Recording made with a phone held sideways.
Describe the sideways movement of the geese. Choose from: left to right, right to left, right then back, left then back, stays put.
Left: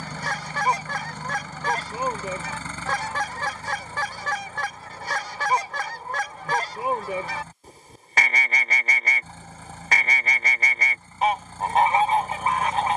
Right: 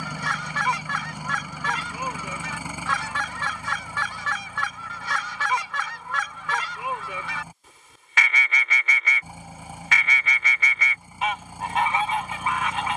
stays put.